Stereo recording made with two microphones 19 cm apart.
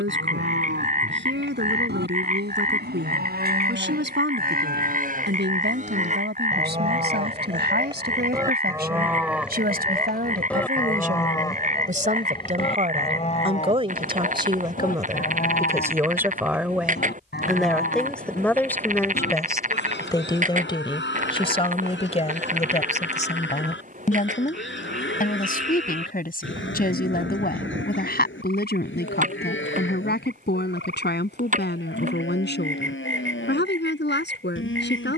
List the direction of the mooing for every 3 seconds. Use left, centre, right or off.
right, right, right, centre, left, left, left, left, left, left, left, left.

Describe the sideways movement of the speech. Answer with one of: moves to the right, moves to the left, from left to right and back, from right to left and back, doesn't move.
moves to the left.